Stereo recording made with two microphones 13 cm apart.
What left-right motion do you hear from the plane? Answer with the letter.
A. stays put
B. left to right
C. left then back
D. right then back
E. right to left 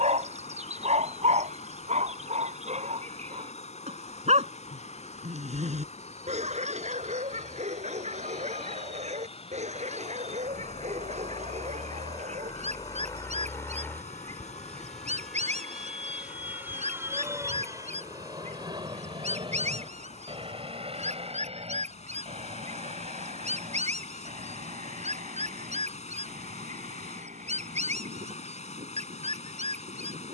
B.